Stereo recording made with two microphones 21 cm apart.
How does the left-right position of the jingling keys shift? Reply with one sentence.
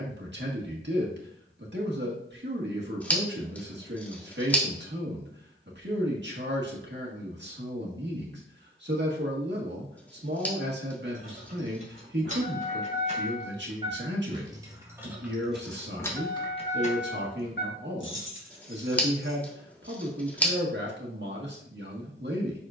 You can hear the jingling keys go from the right side to the left.